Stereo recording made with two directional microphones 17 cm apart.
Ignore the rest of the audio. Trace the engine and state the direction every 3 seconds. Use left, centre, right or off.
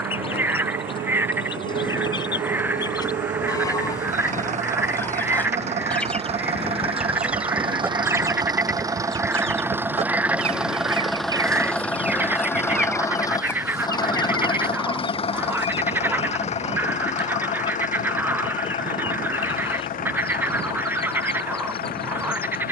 right, right, right, centre, left, left, left, left.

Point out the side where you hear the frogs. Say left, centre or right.
centre.